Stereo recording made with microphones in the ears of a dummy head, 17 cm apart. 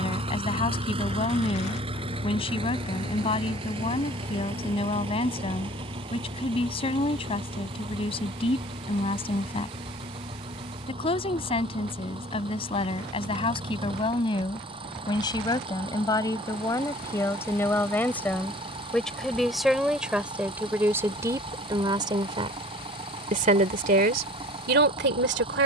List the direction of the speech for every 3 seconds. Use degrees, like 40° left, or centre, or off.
30° left, 30° left, 30° left, 30° left, 30° left, 20° left, centre, 30° right, 50° right.